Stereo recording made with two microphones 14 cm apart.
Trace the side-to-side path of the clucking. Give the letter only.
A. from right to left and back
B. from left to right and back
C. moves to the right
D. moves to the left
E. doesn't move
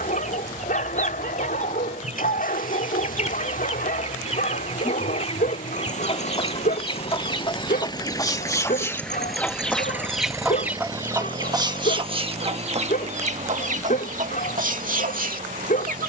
C.